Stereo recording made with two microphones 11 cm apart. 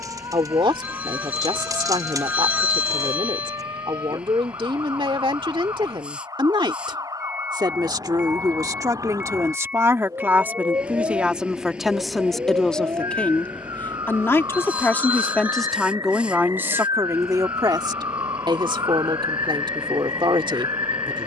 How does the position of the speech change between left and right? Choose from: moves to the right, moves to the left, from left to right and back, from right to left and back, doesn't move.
from right to left and back.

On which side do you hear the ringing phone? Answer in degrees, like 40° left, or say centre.
10° right.